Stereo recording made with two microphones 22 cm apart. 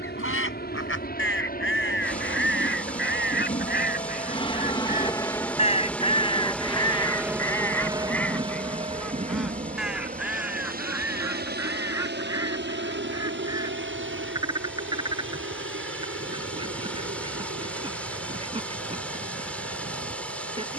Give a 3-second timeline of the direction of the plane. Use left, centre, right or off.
left, left, centre, right, right, right, right.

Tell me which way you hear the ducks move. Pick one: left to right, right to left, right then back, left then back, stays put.
left to right.